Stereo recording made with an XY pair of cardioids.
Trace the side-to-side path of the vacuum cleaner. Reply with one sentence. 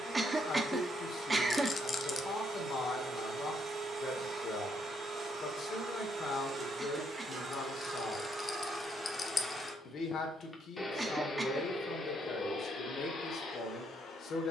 You can hear the vacuum cleaner move from right to left.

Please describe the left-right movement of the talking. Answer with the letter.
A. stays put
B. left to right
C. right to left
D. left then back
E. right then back
A.